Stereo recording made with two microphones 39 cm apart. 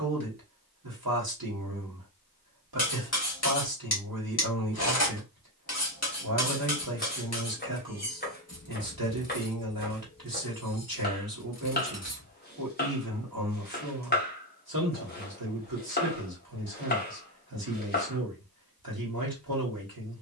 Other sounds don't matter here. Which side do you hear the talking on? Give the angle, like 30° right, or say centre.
60° right.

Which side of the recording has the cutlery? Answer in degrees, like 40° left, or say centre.
40° left.